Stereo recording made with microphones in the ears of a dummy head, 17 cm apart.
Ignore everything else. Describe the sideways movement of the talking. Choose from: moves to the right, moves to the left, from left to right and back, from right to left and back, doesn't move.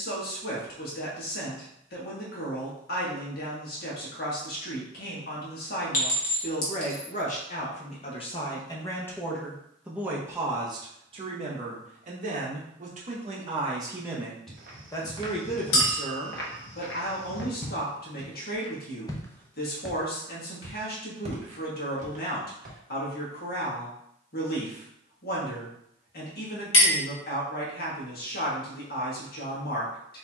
from left to right and back.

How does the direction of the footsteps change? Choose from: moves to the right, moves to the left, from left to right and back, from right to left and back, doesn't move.
from right to left and back.